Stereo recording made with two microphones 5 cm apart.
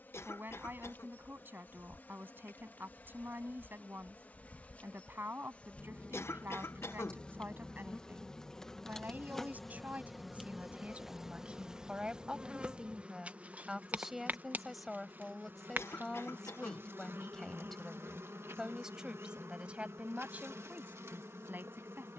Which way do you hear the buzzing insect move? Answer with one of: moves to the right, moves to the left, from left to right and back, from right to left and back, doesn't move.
moves to the right.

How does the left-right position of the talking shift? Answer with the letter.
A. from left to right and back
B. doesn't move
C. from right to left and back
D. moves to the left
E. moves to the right
C.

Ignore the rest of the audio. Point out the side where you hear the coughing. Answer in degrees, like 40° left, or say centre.
70° left.